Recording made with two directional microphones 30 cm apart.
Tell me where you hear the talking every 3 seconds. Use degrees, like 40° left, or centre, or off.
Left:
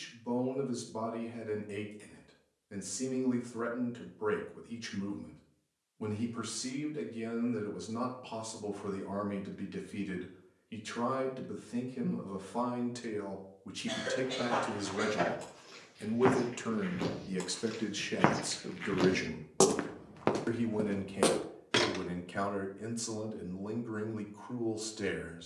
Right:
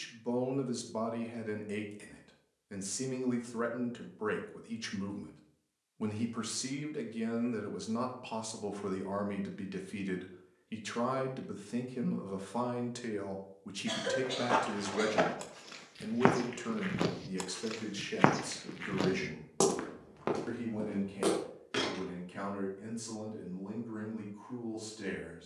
30° right, 30° right, 30° right, 30° right, 10° right, 20° left, 40° left, 50° left, 50° left.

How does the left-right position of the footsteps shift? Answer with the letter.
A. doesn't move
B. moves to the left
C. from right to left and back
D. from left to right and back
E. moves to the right
B.